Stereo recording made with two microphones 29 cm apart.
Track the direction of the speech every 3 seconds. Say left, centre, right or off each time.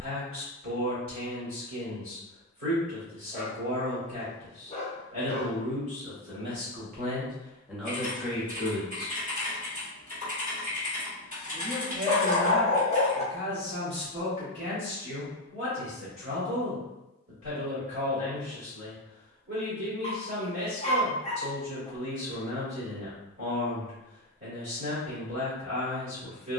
right, right, centre, centre, right, right, right, right, right.